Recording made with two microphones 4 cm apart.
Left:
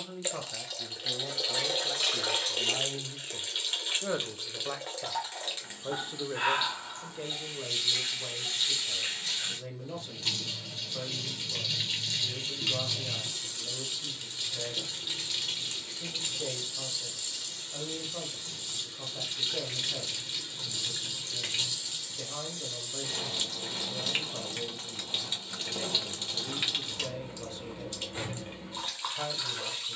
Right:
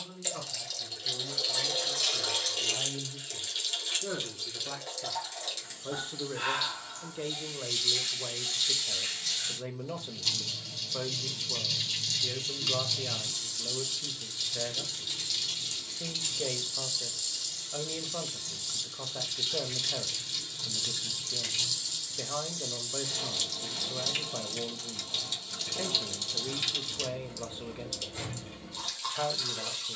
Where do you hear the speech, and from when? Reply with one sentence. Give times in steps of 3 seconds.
In this clip you hear the speech on the left from 0 s, in the centre from 6 s and on the right from 9 s.